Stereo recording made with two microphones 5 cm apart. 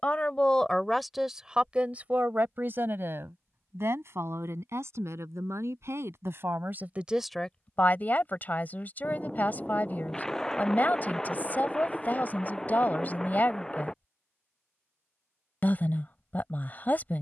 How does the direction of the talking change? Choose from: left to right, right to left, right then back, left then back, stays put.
right then back.